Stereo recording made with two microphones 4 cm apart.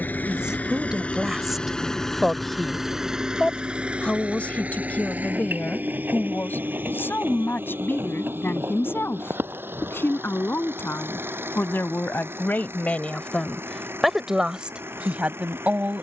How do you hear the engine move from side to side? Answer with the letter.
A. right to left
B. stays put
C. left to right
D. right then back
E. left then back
C.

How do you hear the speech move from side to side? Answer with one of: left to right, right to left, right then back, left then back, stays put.
left then back.